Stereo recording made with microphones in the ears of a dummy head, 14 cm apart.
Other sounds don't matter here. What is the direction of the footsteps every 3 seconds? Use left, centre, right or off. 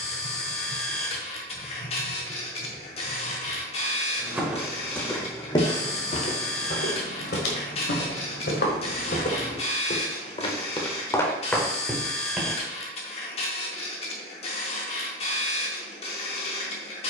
off, centre, left, left, centre, off.